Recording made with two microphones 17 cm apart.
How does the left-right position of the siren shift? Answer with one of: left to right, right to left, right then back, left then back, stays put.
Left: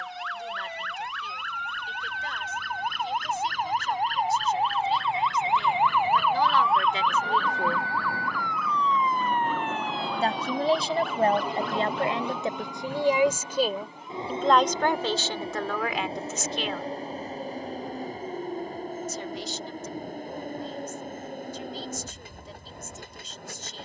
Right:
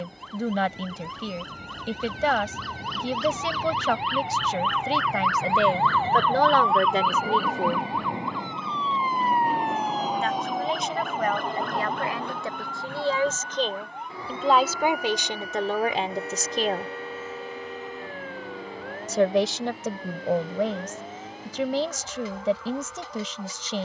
left to right.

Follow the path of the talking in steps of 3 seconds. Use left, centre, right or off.
right, right, right, left, centre, right, right, right.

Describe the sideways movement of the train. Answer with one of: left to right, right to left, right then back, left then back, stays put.
right to left.